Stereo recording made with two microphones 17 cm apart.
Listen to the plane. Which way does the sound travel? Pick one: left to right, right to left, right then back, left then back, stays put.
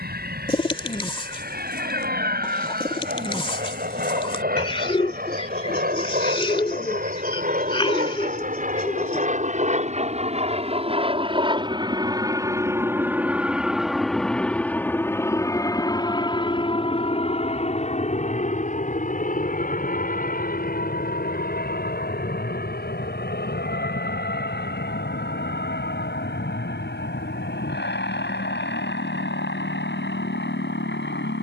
right to left.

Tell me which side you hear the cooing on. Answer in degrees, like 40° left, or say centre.
30° left.